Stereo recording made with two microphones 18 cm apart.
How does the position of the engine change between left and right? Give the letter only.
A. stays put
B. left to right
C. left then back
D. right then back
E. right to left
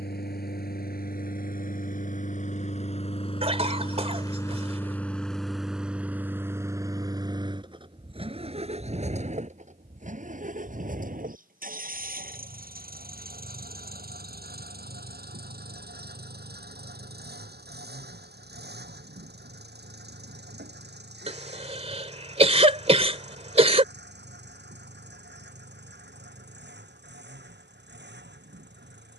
B.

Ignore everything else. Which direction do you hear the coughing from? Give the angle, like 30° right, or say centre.
30° right.